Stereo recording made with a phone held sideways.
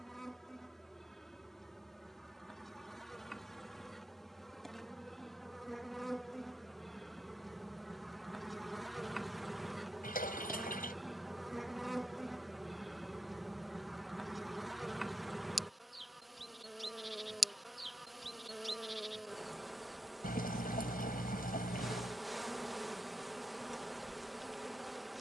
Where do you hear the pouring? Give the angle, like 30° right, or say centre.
80° left.